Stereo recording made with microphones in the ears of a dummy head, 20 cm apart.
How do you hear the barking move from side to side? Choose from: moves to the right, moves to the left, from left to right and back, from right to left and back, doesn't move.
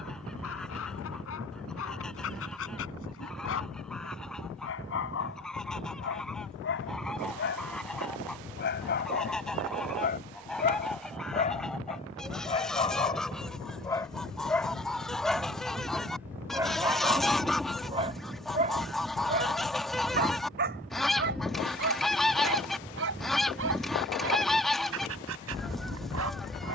moves to the right.